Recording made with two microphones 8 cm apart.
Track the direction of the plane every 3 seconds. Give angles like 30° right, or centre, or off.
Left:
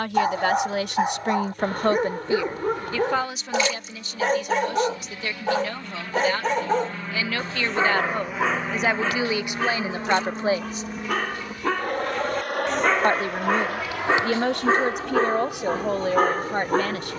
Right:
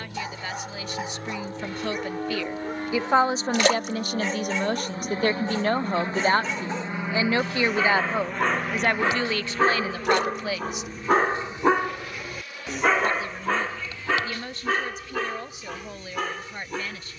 60° right, 40° right, 10° right, 30° left, 50° left, 70° left.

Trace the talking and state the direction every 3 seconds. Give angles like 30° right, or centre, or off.
50° left, 40° right, 20° right, 20° left, 60° left, 60° left.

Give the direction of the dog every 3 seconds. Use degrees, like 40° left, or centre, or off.
50° left, 50° left, 20° left, 30° right, 10° left, 40° left.